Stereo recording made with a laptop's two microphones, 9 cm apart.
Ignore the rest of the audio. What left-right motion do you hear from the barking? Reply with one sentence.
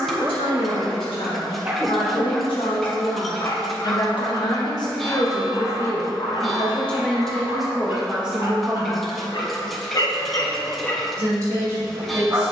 In this clip you hear the barking move from right to left and back again.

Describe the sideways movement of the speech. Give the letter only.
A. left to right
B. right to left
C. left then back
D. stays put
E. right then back
A.